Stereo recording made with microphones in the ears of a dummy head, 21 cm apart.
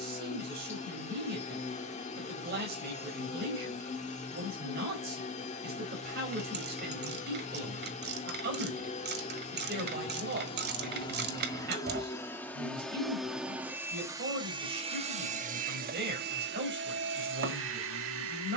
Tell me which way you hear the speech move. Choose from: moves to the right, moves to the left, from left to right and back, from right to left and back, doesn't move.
doesn't move.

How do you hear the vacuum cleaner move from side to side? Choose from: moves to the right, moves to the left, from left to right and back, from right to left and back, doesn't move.
moves to the right.